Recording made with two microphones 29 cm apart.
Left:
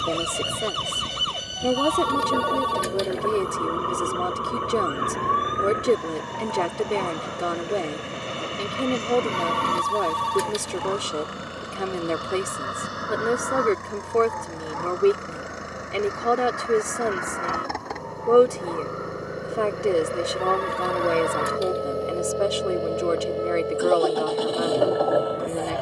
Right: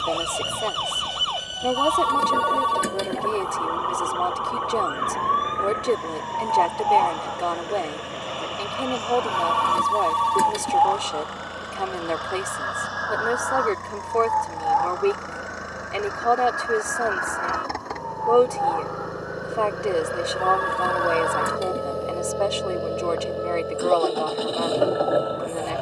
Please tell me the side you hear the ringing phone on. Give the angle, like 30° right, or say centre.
60° right.